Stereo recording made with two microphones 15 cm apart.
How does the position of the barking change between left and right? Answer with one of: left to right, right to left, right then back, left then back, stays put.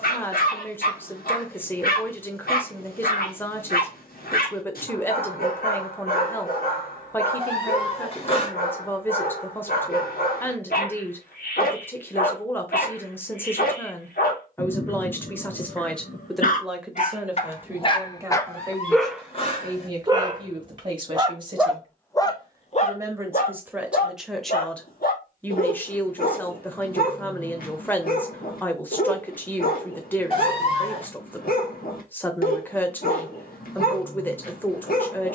right then back.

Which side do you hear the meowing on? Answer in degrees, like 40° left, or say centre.
40° left.